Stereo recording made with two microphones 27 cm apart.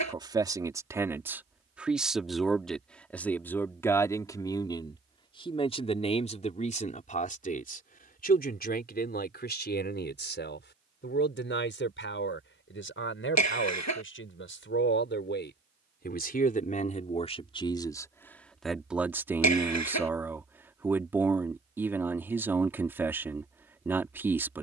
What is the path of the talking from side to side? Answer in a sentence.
In this clip you hear the talking move from right to left and back again.